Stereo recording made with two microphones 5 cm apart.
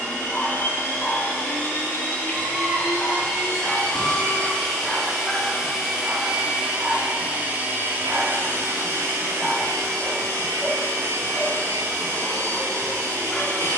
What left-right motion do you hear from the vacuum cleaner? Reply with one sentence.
In this clip you hear the vacuum cleaner move to the right.